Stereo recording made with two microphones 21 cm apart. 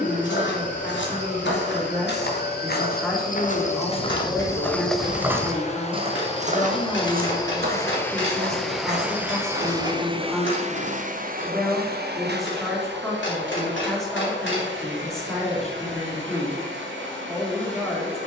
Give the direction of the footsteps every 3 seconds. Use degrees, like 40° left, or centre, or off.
70° left, 20° left, 50° right, 60° right, off, off.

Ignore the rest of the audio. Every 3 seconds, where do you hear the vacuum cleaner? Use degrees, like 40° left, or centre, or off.
40° left, 40° left, 20° left, 30° right, 70° right, 80° right.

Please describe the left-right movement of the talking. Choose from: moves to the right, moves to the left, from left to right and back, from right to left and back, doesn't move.
doesn't move.